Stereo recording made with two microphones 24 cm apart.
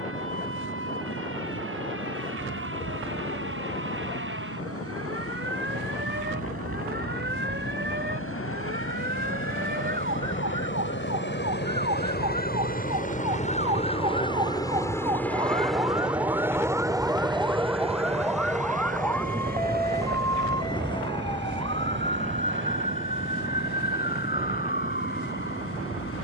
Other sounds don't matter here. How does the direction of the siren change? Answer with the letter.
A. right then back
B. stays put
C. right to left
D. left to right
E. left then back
C.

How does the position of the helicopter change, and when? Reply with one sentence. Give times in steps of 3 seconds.
You can hear the helicopter on the left from 0 s, in the centre from 15 s and on the right from 18 s.